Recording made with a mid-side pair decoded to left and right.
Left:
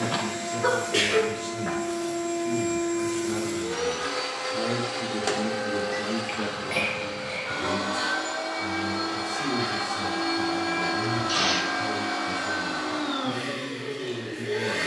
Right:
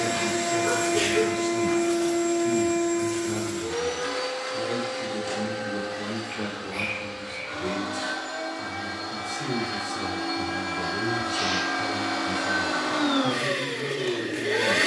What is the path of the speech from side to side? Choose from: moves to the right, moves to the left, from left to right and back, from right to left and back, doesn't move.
from right to left and back.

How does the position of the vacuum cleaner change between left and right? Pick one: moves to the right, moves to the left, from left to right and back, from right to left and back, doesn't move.
from right to left and back.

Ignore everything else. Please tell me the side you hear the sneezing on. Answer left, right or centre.
left.